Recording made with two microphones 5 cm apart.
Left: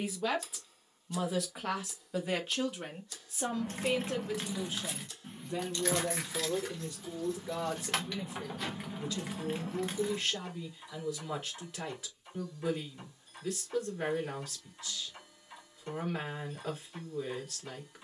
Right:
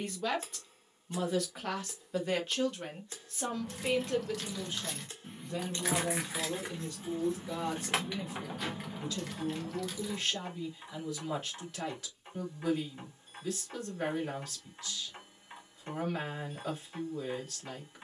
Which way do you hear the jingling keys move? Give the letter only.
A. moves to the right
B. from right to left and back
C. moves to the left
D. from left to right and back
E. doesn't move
D.